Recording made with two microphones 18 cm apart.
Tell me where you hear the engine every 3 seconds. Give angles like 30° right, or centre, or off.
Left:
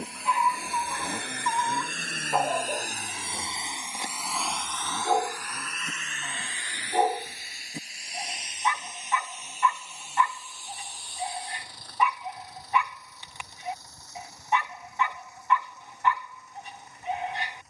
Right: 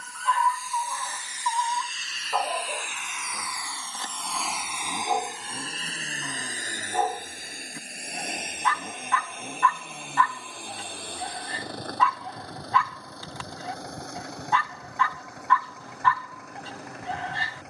60° left, centre, 50° right, 60° right, 70° right, 70° right.